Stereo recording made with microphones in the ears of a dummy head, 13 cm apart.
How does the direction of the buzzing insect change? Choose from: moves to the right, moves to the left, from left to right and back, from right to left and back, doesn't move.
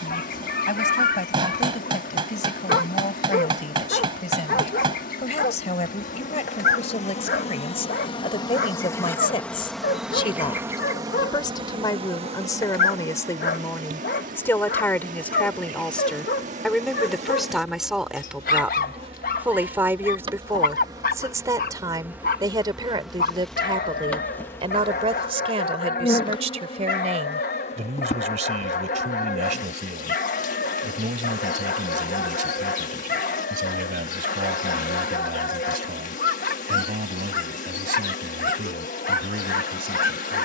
from left to right and back.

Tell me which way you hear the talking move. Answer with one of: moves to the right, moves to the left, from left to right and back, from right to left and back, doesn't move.
moves to the right.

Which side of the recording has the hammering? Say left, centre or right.
right.